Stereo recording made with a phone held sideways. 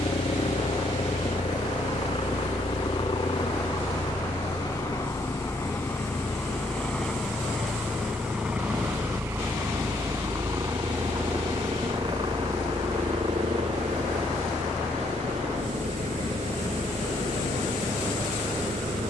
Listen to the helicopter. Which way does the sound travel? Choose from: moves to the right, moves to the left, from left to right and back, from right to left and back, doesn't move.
moves to the right.